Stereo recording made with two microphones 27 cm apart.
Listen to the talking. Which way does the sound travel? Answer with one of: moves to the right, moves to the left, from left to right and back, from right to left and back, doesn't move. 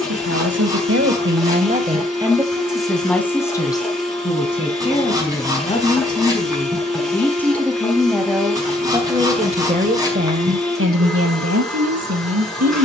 from right to left and back.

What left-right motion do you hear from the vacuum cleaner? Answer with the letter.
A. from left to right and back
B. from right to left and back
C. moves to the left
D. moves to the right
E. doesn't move
E.